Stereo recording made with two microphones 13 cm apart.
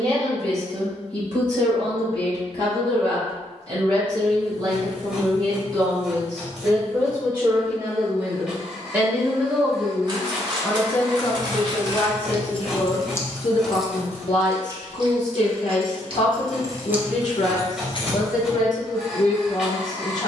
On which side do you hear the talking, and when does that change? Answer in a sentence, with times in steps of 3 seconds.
In this clip you hear the talking on the right from 0 s, in the centre from 9 s and on the left from 12 s.